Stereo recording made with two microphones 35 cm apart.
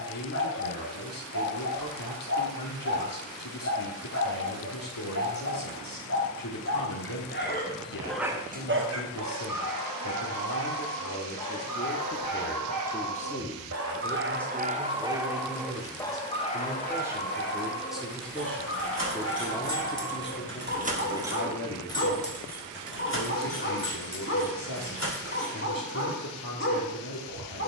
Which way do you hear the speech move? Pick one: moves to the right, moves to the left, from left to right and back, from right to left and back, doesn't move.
from left to right and back.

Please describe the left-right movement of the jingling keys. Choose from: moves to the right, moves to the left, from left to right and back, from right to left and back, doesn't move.
moves to the left.